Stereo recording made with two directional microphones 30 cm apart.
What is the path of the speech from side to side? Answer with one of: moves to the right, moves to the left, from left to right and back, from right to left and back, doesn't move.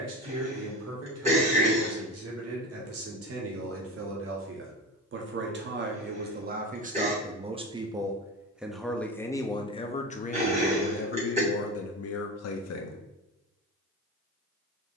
moves to the left.